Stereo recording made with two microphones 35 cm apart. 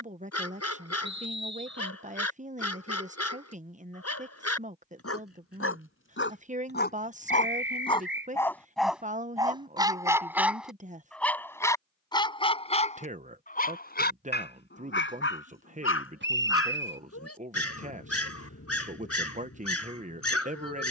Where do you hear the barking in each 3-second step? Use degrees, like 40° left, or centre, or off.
50° left, 50° left, 20° left, centre, 20° left, 40° left, 50° left.